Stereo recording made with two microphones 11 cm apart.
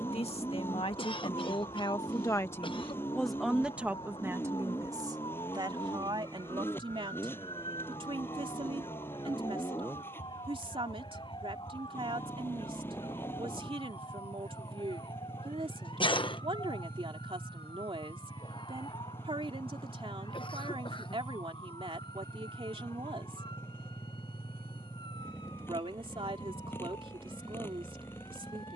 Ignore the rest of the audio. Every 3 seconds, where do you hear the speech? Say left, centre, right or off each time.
left, right, right, right, right, right, right, right, right, right.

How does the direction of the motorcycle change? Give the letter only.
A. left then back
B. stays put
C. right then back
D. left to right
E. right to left
B.